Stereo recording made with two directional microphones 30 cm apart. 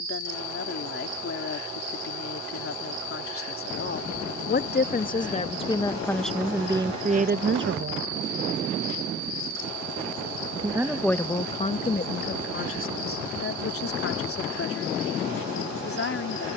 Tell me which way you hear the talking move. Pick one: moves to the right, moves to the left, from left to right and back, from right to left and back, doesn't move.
from left to right and back.